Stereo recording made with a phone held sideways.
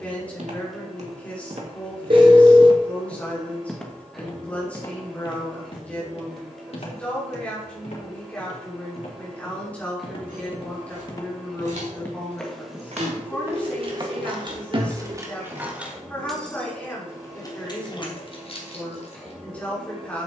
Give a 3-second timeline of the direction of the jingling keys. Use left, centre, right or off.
off, off, off, right, right, centre, left.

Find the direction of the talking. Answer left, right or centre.
centre.